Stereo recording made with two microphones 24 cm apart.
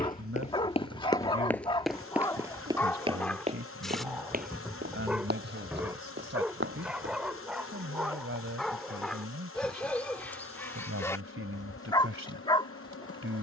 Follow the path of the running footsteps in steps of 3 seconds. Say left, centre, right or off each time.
centre, right, right, off, off.